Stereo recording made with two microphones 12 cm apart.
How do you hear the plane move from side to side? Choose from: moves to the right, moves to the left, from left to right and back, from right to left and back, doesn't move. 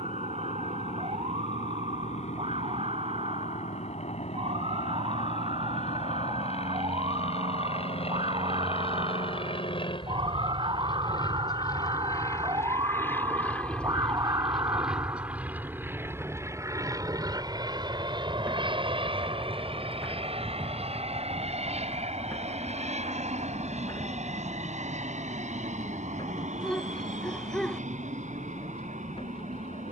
moves to the right.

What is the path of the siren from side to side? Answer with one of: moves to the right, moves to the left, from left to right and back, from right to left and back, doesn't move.
moves to the left.